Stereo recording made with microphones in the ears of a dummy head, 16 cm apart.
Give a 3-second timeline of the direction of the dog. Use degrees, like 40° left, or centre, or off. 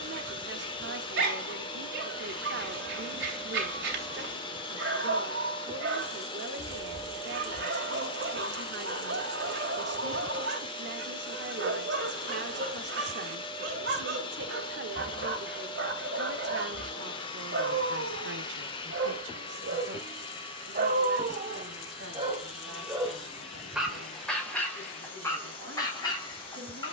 80° right, 80° right, 80° right, 80° right, 80° right, 80° right, 70° right, 30° right, 20° left.